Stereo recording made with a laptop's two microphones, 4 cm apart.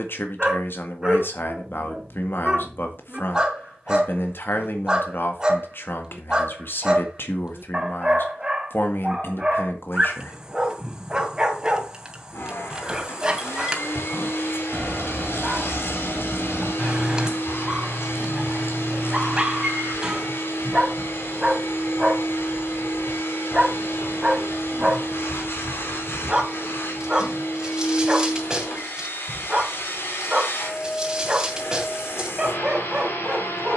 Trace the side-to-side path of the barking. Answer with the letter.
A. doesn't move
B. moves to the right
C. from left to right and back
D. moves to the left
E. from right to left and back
A.